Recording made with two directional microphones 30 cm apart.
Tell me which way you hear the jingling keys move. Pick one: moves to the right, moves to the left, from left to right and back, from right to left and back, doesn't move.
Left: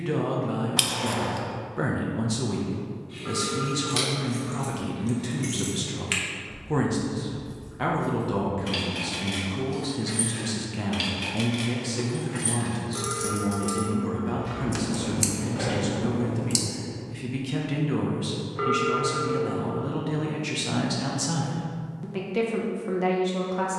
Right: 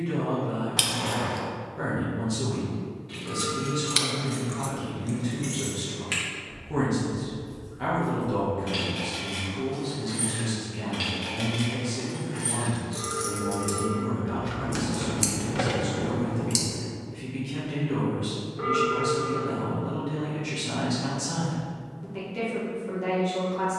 from right to left and back.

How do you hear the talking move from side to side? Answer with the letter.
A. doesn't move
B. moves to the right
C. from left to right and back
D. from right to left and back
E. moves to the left
A.